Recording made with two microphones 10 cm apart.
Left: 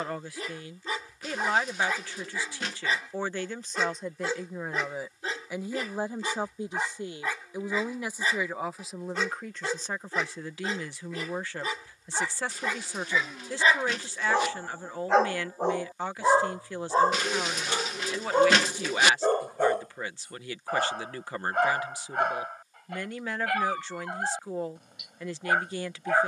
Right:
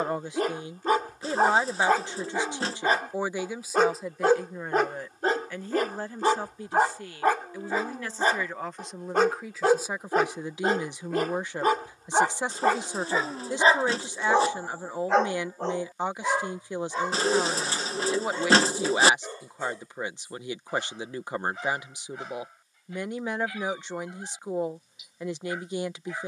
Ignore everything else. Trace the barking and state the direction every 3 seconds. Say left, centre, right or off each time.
right, right, right, right, right, left, left, left, left.